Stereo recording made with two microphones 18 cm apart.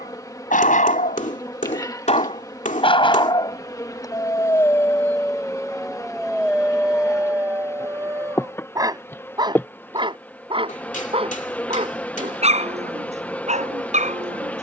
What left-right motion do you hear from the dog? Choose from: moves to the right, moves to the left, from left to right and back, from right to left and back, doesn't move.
moves to the right.